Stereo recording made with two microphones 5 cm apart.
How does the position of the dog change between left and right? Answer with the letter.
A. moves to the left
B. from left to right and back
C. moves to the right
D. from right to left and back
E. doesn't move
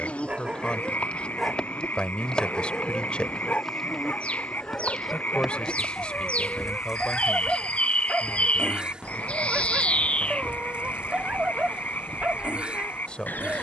D.